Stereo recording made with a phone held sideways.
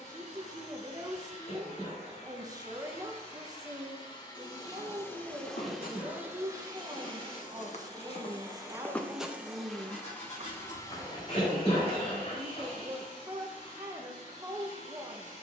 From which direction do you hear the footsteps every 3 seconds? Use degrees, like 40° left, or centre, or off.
off, 80° left, 50° left, 20° right, off.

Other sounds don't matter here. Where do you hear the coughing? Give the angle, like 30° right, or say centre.
40° left.